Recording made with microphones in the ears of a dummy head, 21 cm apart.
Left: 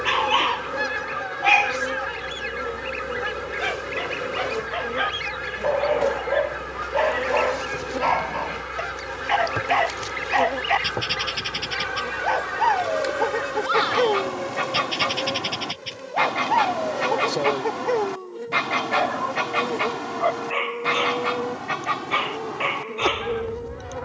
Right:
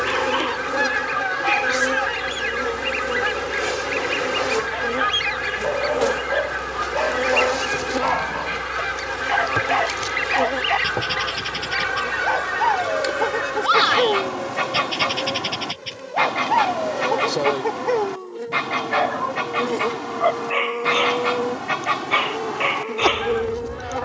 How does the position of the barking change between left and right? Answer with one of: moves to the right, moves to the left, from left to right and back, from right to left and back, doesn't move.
moves to the right.